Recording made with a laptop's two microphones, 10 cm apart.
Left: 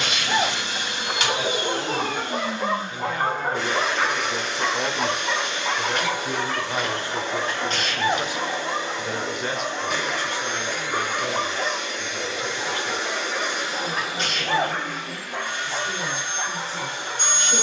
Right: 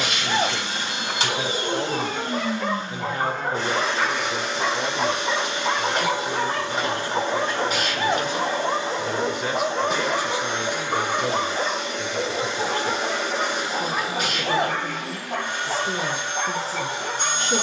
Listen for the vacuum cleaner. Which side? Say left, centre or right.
right.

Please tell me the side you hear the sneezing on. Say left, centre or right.
centre.